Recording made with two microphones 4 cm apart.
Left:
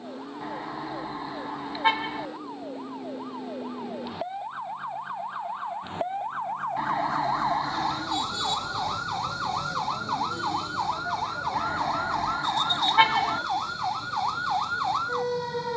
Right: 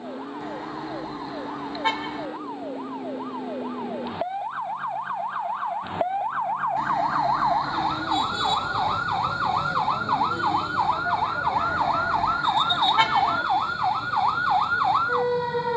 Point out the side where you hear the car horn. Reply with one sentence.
In this clip you hear the car horn in the centre.